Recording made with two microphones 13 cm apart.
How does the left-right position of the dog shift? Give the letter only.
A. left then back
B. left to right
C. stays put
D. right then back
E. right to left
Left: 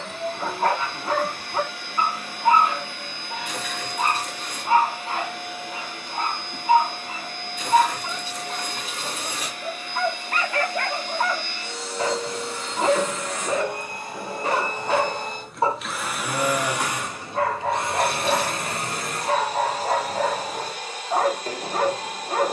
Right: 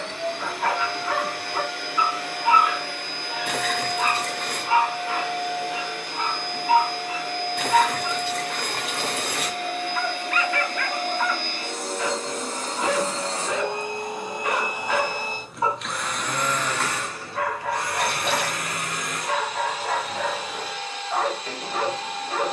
C.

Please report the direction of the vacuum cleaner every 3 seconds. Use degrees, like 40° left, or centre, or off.
70° right, 70° right, 70° right, 60° right, 30° right, 10° left, 30° left, 40° left.